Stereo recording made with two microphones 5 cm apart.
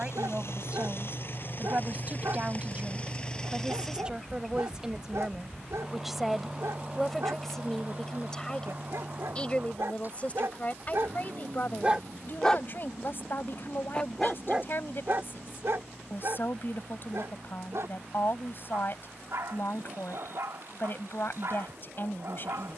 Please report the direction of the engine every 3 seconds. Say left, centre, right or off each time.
left, centre, right, right, right, right, right, right.